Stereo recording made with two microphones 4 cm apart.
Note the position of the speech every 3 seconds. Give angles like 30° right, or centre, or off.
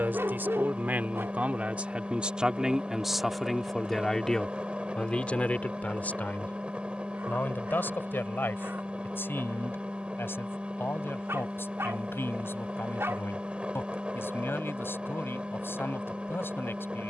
30° right, 20° left, 50° left, 60° left, 60° left, 60° left.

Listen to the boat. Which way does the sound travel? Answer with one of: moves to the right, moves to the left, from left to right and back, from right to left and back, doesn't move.
doesn't move.